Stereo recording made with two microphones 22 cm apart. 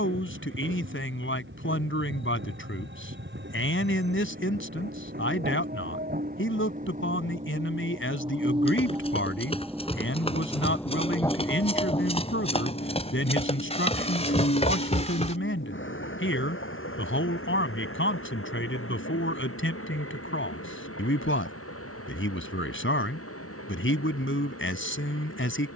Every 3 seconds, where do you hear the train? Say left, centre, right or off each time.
right, right, right, centre, left, left, left, left, left.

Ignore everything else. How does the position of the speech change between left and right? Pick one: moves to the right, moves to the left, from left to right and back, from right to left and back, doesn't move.
doesn't move.